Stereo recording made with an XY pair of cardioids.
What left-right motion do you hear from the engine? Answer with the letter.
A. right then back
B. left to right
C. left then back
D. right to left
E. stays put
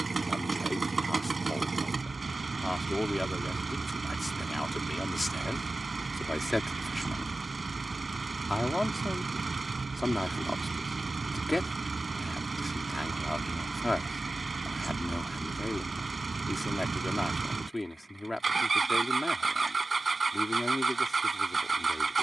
E.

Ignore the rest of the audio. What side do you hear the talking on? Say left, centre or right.
centre.